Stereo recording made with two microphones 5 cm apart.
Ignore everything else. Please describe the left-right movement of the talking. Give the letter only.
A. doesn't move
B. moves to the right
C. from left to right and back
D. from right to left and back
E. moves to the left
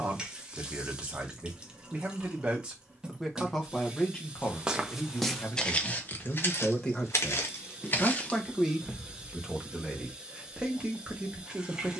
D.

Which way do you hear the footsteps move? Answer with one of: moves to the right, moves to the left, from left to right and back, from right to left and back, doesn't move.
from right to left and back.